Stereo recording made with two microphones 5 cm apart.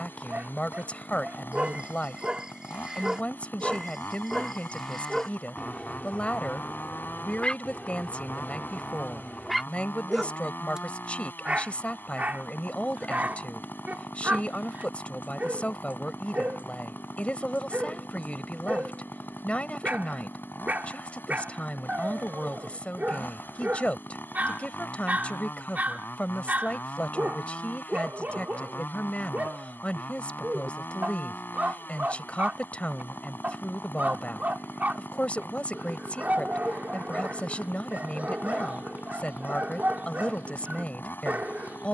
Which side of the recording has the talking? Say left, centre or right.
left.